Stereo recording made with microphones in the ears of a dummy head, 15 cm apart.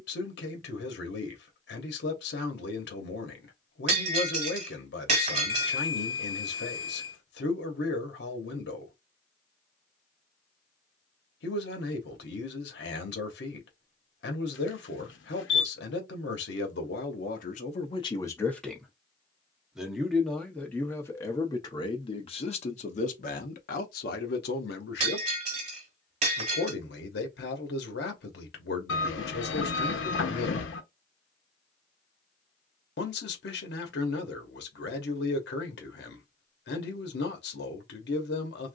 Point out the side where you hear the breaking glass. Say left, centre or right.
right.